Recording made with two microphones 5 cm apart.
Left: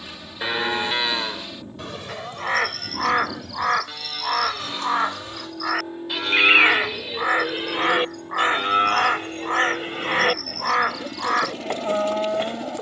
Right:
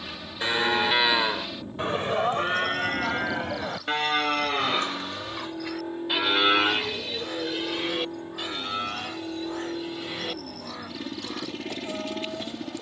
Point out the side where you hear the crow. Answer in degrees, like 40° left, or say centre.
60° left.